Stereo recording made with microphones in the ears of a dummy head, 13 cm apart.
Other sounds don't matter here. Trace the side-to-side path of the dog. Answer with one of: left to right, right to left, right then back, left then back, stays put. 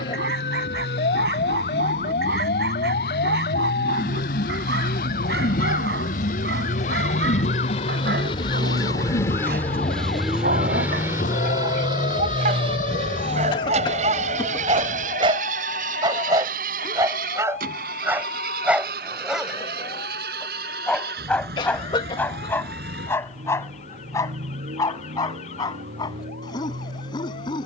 right to left.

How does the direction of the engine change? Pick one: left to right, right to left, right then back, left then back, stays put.
left to right.